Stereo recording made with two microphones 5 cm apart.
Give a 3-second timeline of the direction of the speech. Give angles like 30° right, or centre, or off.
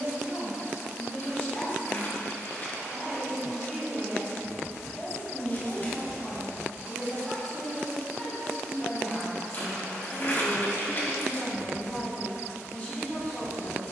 40° left, centre, 10° left, 30° left, 30° left.